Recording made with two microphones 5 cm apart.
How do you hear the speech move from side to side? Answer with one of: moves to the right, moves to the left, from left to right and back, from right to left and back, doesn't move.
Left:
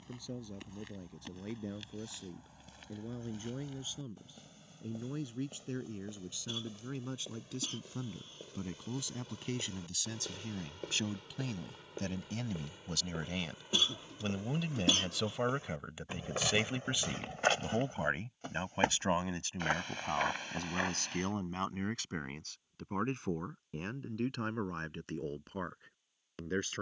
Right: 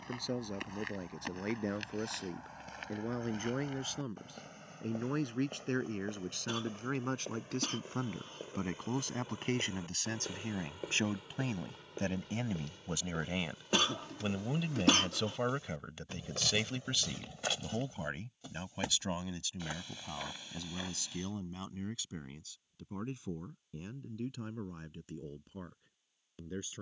moves to the left.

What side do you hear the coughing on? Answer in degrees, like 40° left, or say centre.
80° right.